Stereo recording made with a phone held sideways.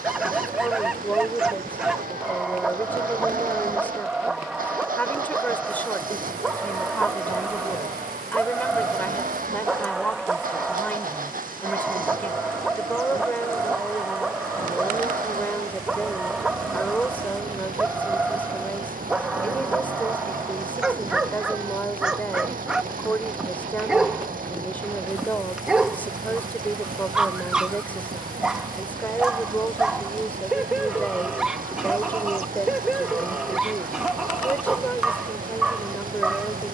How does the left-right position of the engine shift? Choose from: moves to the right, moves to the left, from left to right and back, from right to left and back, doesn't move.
doesn't move.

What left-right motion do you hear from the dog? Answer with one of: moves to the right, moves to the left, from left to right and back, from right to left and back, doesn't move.
doesn't move.